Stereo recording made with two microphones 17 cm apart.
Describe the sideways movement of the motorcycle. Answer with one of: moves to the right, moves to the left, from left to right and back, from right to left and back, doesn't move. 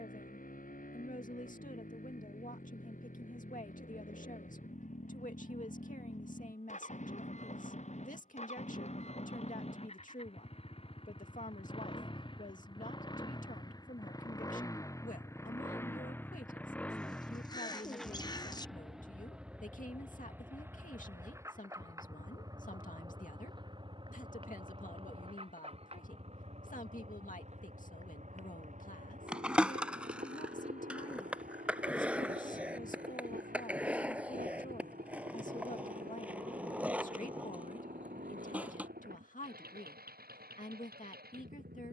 moves to the right.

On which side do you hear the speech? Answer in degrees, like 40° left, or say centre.
50° left.